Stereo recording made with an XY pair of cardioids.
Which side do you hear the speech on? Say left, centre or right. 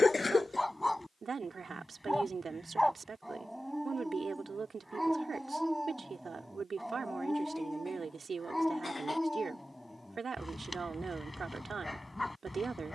right.